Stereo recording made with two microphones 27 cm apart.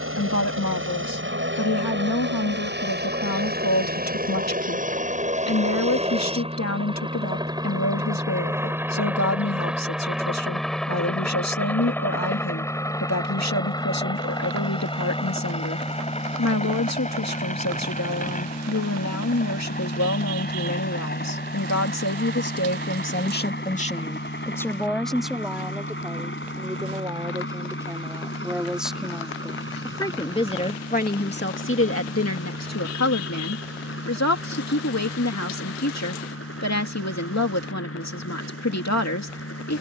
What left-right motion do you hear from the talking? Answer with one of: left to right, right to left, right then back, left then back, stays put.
right then back.